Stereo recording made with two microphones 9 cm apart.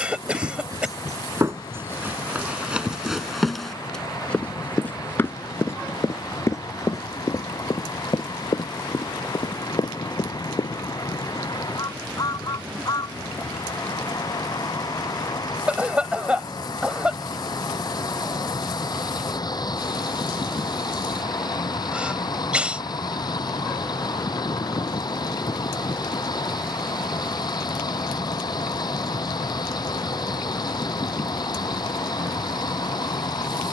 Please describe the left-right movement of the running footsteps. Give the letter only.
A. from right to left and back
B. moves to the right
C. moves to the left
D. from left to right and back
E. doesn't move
C.